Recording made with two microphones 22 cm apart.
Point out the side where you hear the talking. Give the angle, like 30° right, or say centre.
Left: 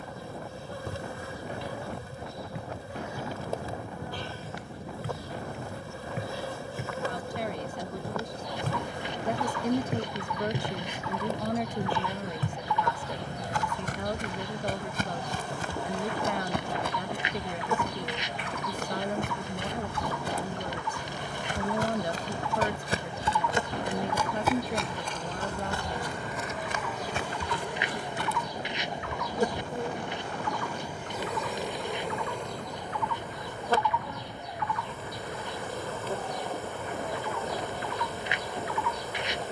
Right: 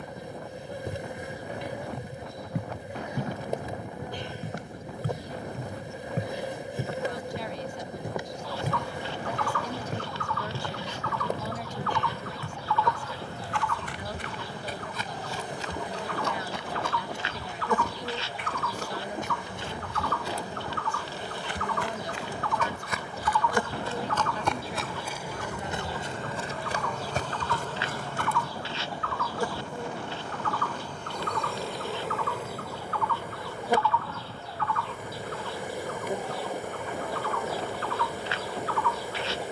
60° left.